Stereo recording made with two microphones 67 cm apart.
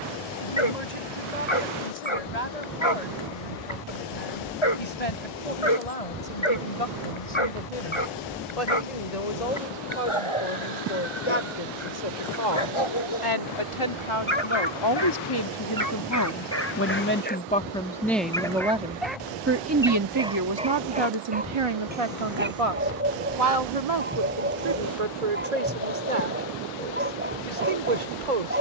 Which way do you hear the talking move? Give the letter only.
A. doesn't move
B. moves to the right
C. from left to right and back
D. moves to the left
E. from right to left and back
B.